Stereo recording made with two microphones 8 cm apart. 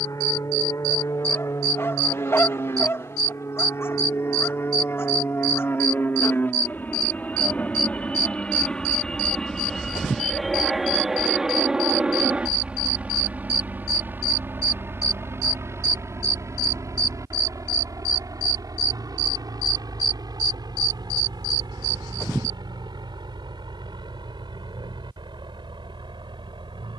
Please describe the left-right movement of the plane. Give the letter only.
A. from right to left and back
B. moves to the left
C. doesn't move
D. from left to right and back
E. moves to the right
E.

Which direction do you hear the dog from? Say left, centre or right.
left.